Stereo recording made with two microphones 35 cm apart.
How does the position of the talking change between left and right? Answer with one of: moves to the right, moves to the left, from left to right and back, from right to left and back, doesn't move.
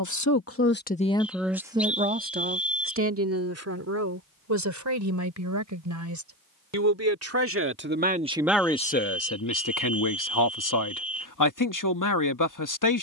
from left to right and back.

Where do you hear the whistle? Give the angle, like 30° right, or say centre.
centre.